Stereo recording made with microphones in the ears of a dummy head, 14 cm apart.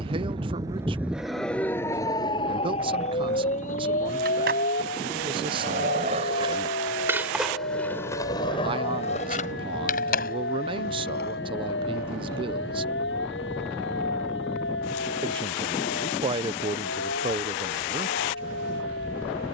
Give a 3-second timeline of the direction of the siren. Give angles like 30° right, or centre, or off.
centre, 50° left, 60° left, 70° left, 70° left, 70° left, 70° left.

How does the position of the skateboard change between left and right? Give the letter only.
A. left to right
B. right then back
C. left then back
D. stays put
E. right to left
E.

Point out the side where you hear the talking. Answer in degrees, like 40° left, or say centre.
30° right.